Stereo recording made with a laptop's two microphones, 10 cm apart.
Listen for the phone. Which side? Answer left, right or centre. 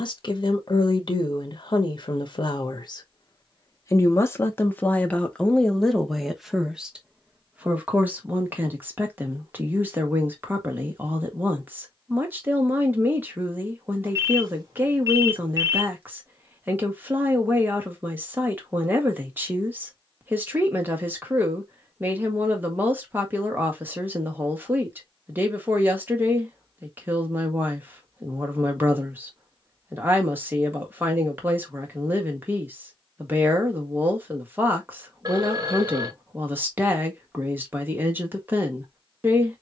right.